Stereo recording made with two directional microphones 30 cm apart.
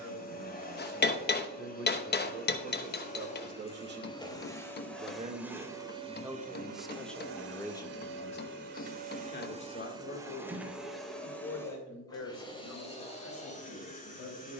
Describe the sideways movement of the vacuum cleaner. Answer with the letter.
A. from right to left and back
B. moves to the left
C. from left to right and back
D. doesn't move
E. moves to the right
C.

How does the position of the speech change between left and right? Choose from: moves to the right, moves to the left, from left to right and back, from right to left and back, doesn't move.
moves to the left.